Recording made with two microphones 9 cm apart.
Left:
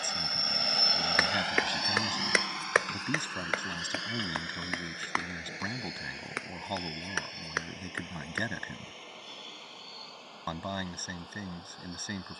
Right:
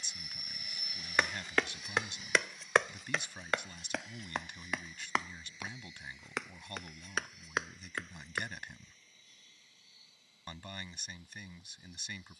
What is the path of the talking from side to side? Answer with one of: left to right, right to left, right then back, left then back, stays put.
stays put.